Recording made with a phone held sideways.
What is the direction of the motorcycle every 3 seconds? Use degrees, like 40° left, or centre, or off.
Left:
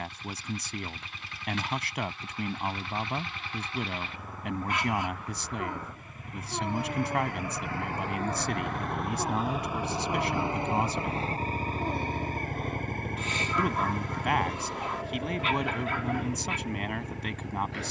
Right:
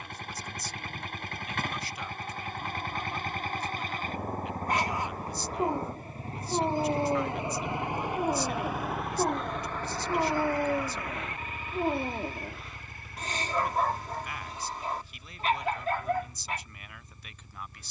50° right, 40° right, 20° right, 20° left, 60° left, 70° left.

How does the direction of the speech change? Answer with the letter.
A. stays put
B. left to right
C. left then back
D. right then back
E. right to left
A.